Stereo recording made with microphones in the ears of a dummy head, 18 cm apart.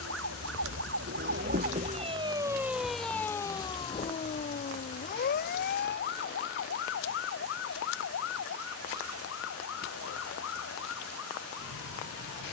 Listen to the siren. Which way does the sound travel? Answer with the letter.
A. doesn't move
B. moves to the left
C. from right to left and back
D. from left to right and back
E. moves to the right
B.